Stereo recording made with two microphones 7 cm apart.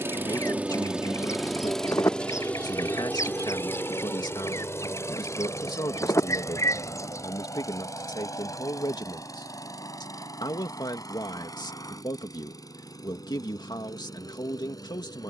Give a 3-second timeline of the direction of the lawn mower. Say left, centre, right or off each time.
centre, left, left, left, left.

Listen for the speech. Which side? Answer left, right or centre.
left.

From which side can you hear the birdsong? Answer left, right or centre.
left.